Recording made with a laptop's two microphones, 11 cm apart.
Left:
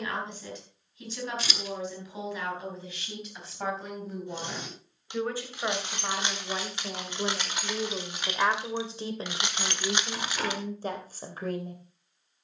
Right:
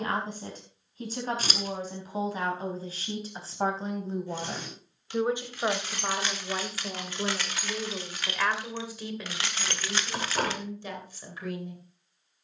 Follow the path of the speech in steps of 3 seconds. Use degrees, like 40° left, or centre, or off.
40° right, 30° right, 10° left, 40° left.